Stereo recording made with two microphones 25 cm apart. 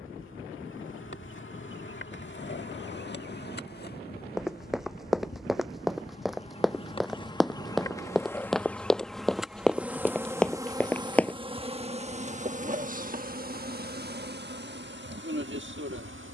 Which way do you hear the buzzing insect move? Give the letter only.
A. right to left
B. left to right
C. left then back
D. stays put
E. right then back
B.